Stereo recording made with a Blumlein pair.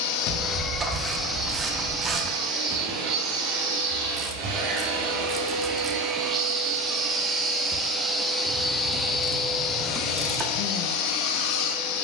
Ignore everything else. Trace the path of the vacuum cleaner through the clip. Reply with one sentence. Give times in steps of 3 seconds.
You can hear the vacuum cleaner in the centre from 0 s, on the right from 3 s, in the centre from 6 s and on the left from 9 s.